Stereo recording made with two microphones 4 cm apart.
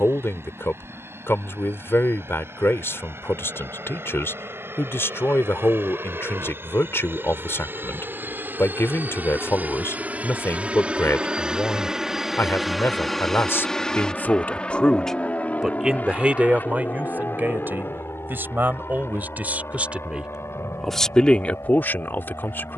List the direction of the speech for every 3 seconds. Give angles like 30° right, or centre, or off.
70° left, 70° left, 70° left, 70° left, 50° left, 30° right, 30° right, 40° left.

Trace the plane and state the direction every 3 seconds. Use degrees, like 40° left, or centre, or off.
70° right, 70° right, 60° right, 30° right, 10° left, 40° left, 50° left, 60° left.